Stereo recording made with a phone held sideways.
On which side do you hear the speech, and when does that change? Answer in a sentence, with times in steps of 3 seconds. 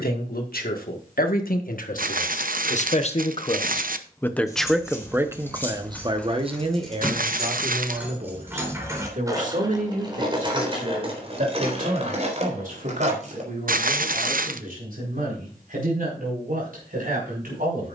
In this clip you hear the speech on the left from 0 s, in the centre from 3 s and on the right from 6 s.